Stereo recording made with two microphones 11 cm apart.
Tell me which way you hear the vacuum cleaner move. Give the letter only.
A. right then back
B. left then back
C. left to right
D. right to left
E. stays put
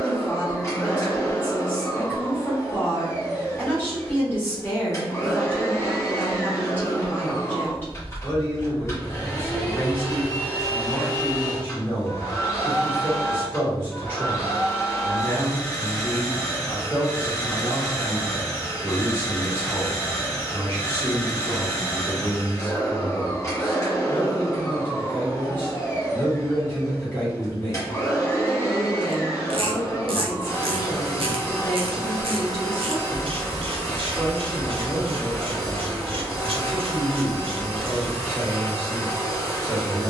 E.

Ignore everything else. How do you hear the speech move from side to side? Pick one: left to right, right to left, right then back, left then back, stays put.
stays put.